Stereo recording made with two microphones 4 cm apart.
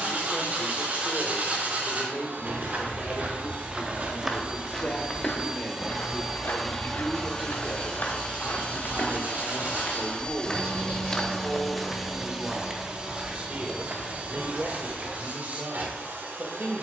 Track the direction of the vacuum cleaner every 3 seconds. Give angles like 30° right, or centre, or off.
50° right, 30° right, 20° left, 20° left, 30° right, 50° right.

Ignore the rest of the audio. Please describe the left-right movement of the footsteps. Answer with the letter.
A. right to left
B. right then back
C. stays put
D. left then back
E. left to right
D.